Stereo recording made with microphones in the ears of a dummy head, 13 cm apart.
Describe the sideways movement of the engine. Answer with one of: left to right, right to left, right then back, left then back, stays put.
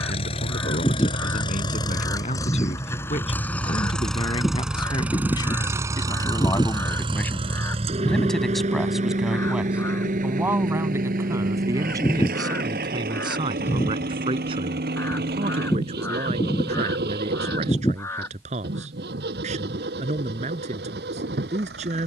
left to right.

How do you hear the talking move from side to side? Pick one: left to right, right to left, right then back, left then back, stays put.
left to right.